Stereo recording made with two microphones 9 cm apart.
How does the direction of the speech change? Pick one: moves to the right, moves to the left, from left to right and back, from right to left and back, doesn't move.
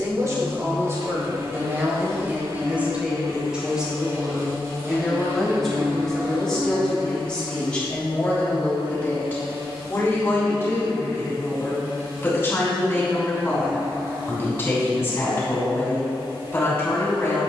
moves to the left.